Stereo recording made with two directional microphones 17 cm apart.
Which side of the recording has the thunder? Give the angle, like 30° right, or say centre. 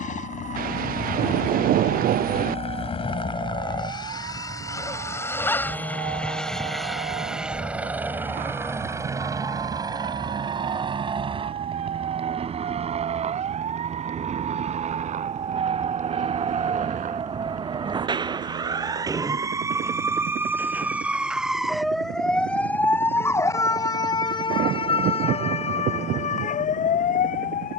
70° right.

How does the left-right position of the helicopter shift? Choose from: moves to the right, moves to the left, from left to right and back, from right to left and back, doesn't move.
moves to the right.